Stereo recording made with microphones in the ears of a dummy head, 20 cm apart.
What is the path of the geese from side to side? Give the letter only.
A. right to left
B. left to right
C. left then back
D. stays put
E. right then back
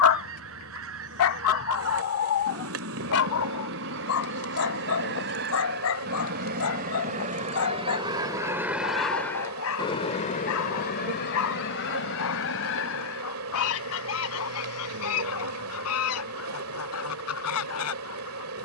A.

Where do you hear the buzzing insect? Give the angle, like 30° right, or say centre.
70° right.